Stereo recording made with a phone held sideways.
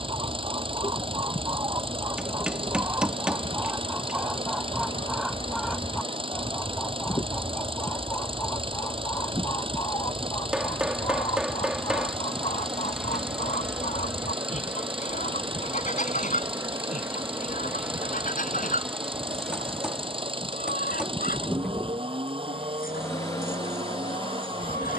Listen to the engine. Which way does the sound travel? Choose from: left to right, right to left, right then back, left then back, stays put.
stays put.